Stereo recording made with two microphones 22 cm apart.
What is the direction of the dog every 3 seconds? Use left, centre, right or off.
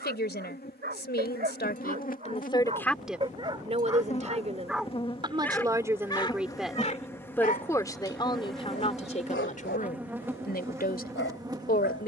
right, centre, left, left.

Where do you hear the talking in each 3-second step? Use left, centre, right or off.
left, right, centre, left.